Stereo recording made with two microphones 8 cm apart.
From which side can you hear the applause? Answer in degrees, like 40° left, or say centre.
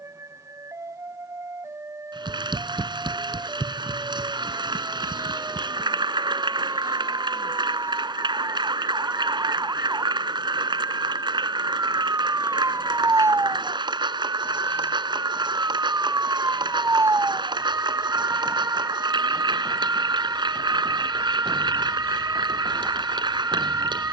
70° right.